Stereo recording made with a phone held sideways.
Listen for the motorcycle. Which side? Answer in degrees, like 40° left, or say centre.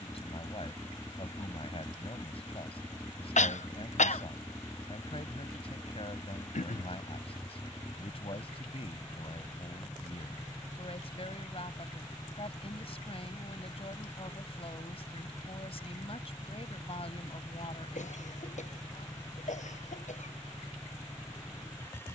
20° left.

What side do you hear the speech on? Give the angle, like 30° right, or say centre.
50° left.